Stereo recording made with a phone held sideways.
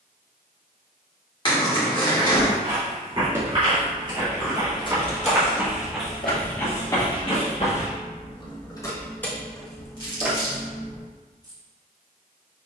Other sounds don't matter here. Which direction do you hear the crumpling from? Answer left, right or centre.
left.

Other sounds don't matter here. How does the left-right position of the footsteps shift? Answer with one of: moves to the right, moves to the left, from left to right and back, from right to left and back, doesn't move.
moves to the left.